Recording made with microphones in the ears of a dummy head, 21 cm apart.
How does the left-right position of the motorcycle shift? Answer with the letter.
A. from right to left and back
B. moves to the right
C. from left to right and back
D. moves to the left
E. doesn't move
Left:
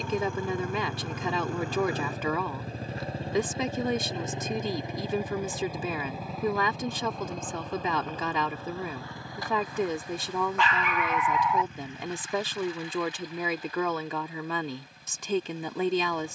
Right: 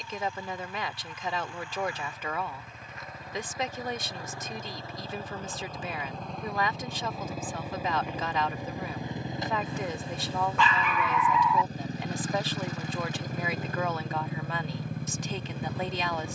B.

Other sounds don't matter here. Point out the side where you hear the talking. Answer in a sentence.
You can hear the talking on the left.